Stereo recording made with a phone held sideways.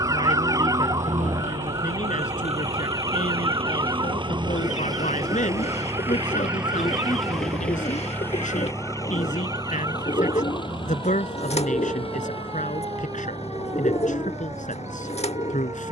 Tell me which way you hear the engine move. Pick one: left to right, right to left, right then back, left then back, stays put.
right to left.